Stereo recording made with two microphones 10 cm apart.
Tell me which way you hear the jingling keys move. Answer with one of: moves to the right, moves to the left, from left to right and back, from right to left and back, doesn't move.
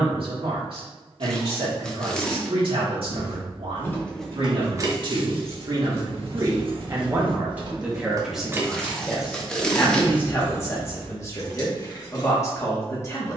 from left to right and back.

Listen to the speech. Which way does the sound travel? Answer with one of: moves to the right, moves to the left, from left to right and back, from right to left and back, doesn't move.
moves to the left.